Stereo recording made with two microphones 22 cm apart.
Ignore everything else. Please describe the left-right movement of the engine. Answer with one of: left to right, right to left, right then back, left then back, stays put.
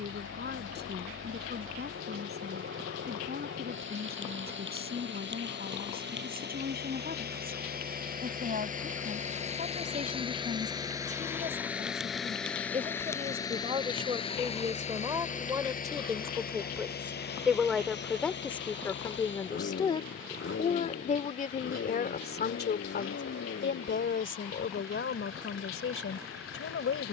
right to left.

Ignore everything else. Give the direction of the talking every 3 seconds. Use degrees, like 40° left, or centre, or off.
50° right, 50° right, 40° right, 40° right, 30° right, 10° right, 20° left, 50° left, 70° left.